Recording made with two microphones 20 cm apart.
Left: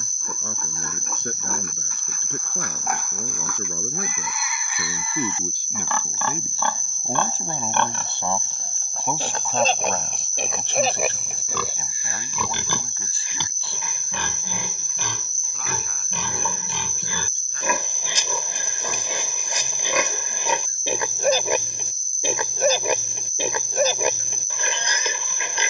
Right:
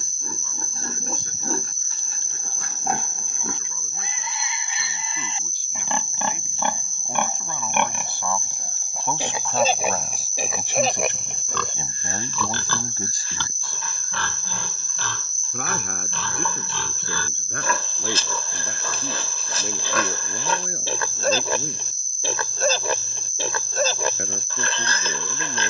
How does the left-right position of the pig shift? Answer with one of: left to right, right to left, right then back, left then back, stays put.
right to left.